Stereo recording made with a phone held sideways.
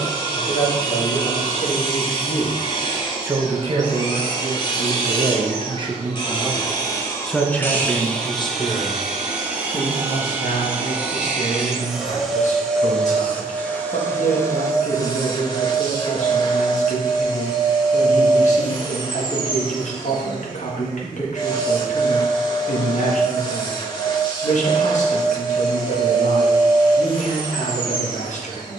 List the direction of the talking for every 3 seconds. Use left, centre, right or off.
left, right, centre, left, left, left, left, left, left, left.